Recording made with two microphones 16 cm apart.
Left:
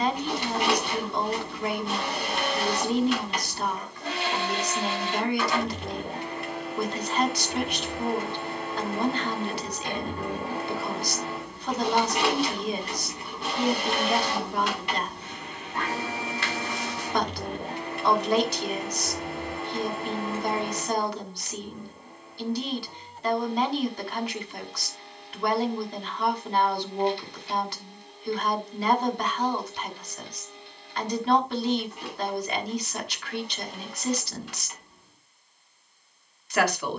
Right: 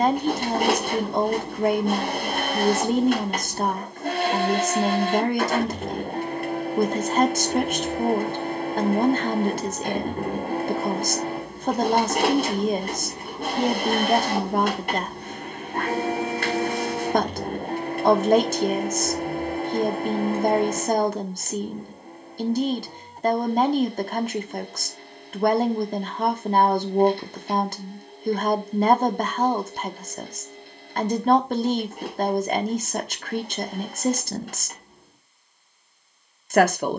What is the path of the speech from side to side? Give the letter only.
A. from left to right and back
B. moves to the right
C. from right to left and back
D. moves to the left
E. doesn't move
E.